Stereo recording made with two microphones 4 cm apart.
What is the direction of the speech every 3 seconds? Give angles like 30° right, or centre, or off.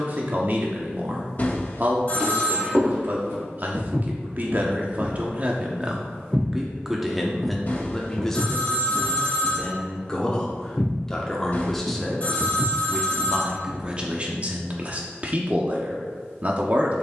50° right, 40° right, centre, 10° left, 20° right, 40° right.